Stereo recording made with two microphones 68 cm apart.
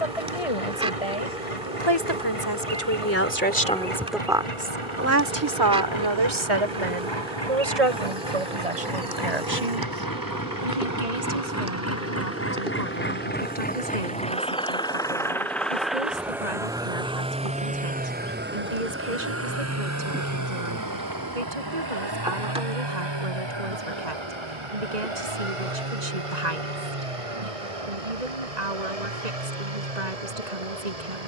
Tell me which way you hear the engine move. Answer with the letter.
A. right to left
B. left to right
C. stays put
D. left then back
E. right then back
B.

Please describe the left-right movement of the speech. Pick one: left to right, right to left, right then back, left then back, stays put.
left to right.